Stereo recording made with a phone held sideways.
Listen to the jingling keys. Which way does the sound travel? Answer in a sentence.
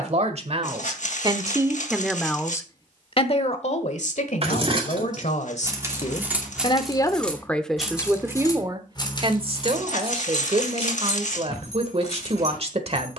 In this clip you hear the jingling keys move to the left.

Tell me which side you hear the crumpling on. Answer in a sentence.
You can hear the crumpling on the left.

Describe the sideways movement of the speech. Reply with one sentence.
You can hear the speech go left and come back.